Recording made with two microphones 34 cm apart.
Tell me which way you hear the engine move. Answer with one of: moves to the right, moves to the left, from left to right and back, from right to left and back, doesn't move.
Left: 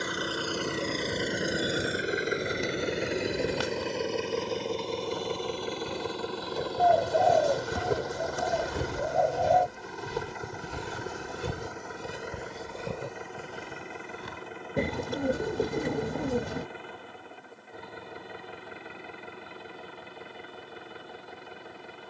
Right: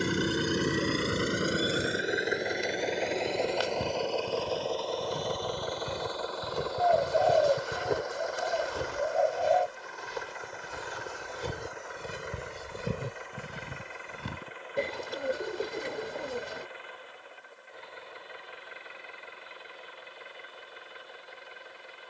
moves to the left.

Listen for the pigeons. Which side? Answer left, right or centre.
left.